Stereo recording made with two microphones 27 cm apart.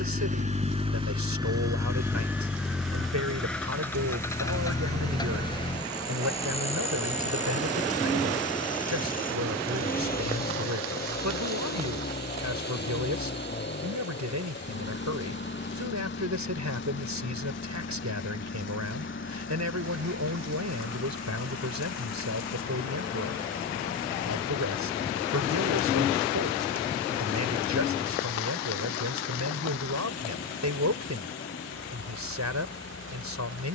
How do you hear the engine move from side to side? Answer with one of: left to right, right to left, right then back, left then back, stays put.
right to left.